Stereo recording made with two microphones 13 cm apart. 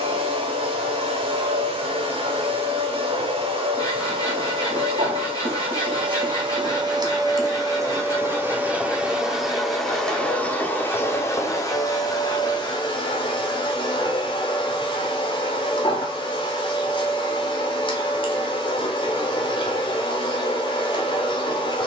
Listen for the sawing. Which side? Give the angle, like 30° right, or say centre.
30° left.